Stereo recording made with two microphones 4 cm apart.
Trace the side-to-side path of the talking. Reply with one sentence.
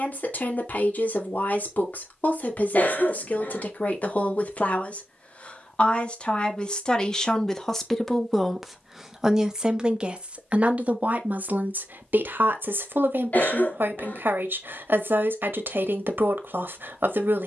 In this clip you hear the talking move to the right.